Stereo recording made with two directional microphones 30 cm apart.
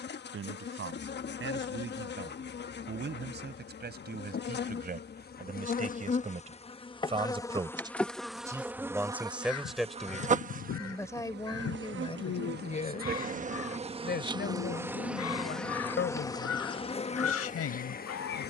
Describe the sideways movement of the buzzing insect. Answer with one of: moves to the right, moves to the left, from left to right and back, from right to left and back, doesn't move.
from left to right and back.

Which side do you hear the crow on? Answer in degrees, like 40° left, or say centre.
60° left.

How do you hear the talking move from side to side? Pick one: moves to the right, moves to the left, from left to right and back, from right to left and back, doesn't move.
moves to the left.